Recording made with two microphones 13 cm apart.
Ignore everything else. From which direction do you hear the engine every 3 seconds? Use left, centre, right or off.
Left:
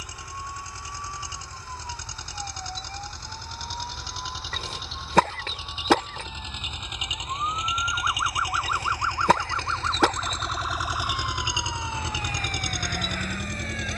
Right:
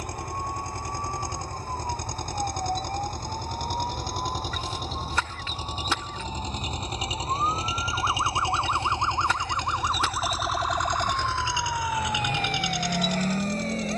right, right, right, centre, left.